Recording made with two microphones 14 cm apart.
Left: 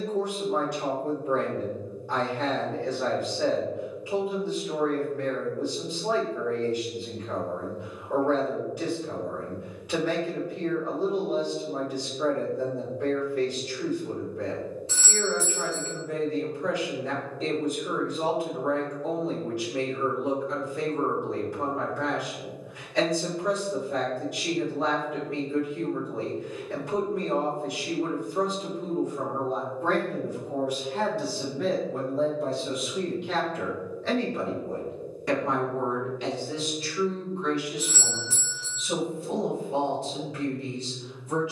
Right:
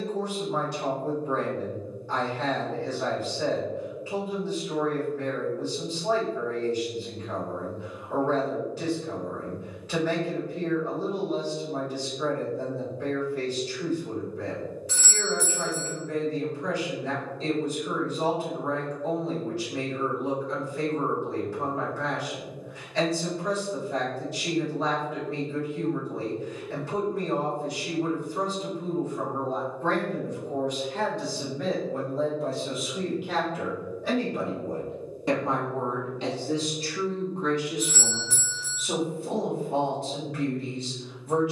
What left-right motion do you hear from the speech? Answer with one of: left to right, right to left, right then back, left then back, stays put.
left to right.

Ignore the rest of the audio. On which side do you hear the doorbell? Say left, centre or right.
left.